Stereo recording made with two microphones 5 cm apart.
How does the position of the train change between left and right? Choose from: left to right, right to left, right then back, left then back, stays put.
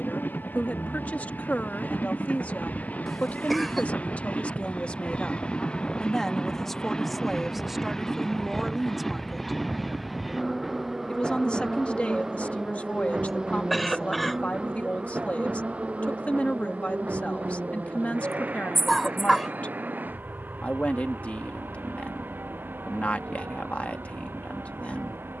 left to right.